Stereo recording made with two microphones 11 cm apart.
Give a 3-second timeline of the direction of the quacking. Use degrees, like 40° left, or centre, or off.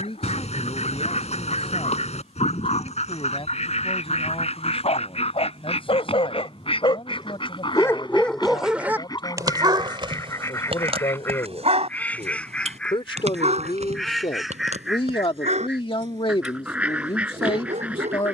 70° left, 70° left, 50° left, 30° left, 10° left, 10° right.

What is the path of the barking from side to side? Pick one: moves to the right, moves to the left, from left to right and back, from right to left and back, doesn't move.
moves to the right.